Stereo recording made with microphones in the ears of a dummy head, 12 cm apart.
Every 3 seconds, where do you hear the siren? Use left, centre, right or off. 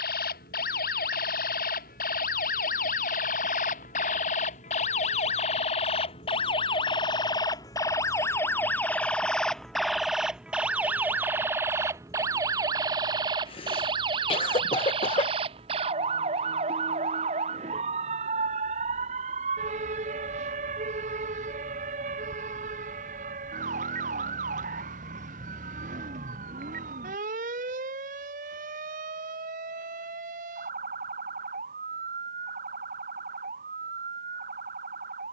left, left, left, centre, right, right, right, right, right, right, right, right.